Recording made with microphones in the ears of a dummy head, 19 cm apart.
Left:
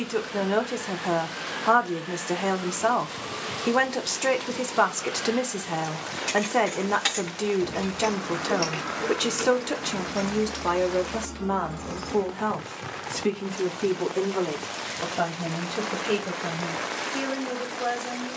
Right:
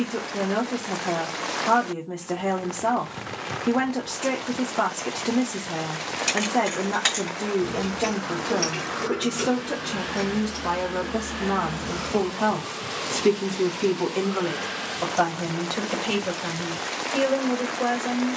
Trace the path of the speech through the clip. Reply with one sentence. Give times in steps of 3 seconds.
You can hear the speech on the left from 0 s, in the centre from 12 s and on the right from 15 s.